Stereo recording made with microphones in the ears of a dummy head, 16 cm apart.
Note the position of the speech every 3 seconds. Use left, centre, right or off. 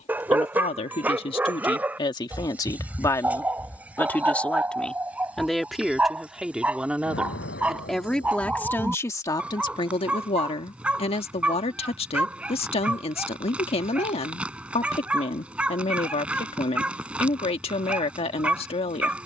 left, centre, centre, left, left, left, left.